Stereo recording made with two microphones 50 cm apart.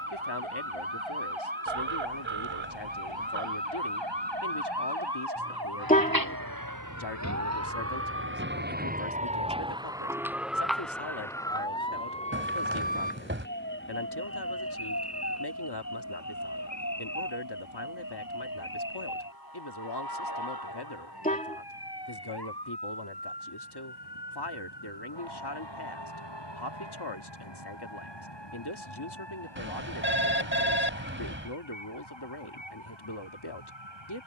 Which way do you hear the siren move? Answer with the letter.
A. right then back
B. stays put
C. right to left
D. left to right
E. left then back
C.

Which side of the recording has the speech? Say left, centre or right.
left.